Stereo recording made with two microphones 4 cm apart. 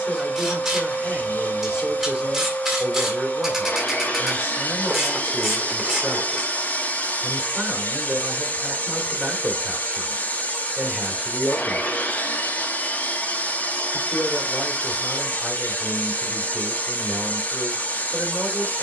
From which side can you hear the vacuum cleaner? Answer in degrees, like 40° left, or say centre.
40° left.